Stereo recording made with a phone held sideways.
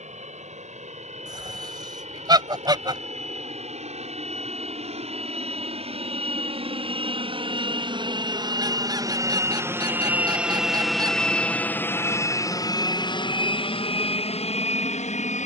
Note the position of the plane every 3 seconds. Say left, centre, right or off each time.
right, right, right, centre, left.